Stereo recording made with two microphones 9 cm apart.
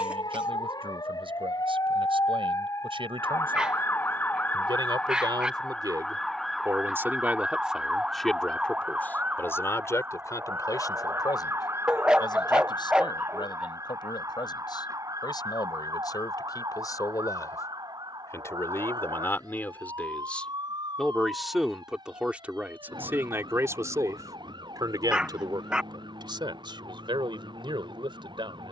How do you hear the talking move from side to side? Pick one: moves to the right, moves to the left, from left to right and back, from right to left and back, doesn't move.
from right to left and back.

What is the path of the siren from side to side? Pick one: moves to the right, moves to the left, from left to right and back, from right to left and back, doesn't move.
moves to the right.